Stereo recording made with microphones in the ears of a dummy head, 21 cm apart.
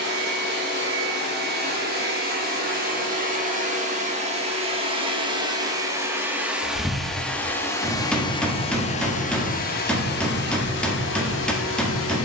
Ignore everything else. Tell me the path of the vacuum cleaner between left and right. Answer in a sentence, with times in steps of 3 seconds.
In this clip you hear the vacuum cleaner on the right from 0 s, in the centre from 6 s and on the left from 9 s.